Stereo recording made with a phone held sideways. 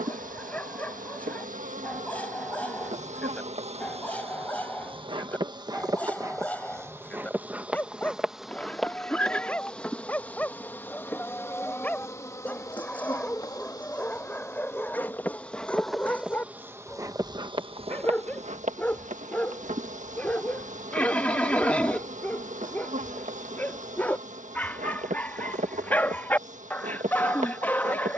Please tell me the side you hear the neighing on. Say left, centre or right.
centre.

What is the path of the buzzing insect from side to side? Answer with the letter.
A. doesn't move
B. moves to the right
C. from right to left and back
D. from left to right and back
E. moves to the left
C.